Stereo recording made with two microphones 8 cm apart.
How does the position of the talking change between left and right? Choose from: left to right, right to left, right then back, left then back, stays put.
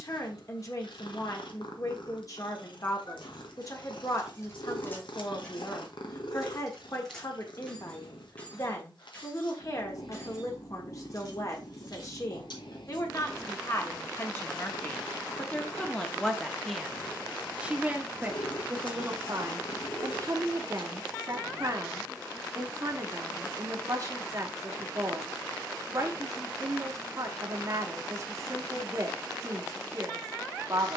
left to right.